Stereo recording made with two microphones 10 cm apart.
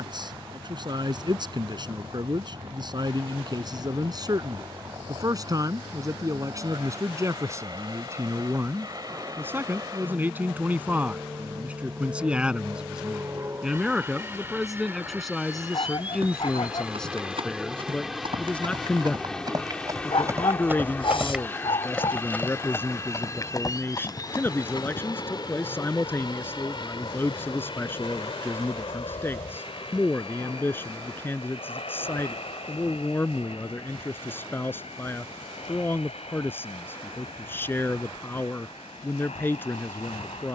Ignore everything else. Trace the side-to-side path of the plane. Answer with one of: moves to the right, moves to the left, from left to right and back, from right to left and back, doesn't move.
moves to the left.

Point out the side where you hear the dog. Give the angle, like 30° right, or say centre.
60° left.